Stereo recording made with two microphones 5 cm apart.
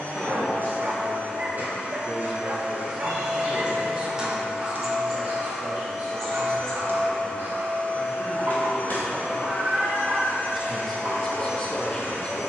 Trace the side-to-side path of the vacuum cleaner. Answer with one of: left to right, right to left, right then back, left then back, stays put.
right to left.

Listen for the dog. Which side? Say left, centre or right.
right.